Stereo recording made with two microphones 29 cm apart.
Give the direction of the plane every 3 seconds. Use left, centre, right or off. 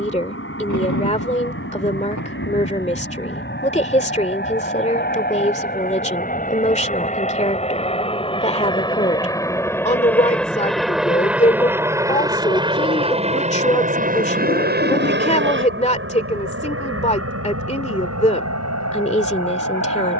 left, left, left, centre, right, right, right.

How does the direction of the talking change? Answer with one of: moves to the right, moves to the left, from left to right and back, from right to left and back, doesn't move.
doesn't move.